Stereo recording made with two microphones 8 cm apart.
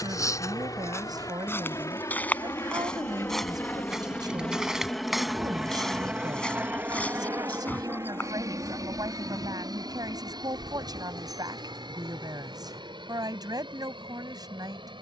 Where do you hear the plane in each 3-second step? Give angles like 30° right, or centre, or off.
50° left, 10° left, 30° right, 60° right, 70° right.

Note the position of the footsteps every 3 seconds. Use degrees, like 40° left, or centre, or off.
30° left, centre, 20° left, 40° left, off.